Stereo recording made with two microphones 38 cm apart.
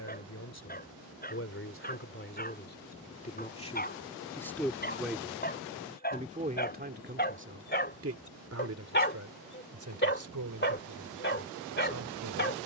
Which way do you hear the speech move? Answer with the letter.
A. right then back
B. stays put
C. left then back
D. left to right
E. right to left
D.